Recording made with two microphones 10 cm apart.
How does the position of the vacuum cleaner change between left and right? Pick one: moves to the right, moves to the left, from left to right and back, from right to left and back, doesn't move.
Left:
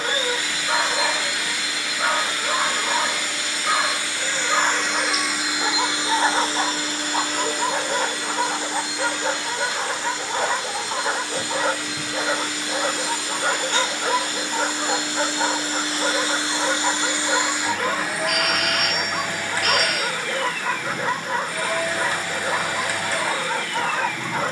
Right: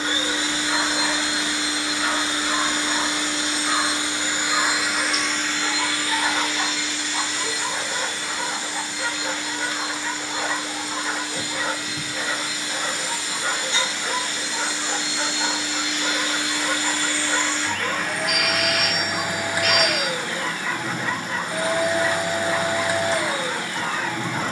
from right to left and back.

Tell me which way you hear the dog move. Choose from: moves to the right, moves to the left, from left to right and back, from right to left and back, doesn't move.
doesn't move.